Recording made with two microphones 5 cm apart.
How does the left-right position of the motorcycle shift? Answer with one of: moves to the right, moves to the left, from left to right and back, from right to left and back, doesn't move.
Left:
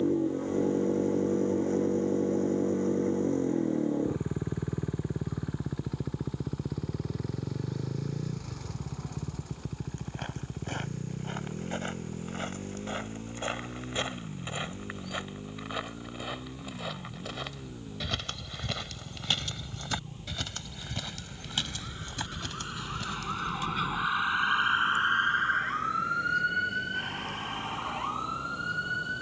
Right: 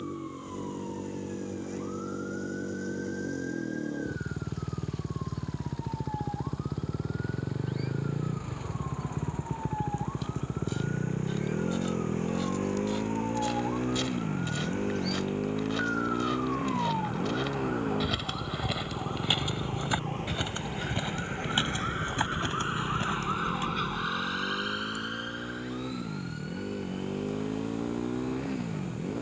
moves to the right.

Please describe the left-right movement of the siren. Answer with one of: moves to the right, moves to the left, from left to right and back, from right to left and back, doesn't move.
moves to the left.